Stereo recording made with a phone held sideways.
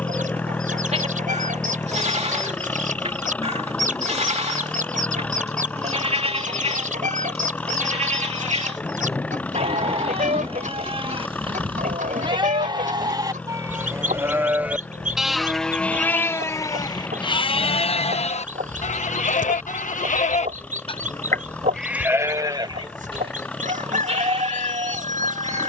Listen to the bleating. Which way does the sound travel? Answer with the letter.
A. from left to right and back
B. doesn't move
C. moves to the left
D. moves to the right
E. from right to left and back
E.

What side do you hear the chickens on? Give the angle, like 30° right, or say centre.
70° right.